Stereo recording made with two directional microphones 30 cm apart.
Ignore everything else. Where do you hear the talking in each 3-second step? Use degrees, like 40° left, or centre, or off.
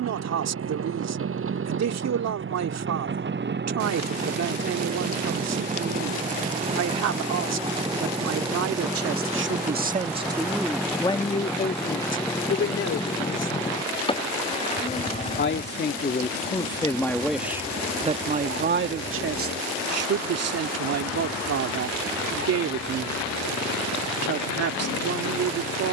60° right, 60° right, 60° right, 10° right, 50° left, 20° left, 40° right, 60° right, 60° right.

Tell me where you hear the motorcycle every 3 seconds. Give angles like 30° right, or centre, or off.
40° right, 30° right, 20° right, centre, 10° left, 30° left, 40° left, 40° left, 50° left.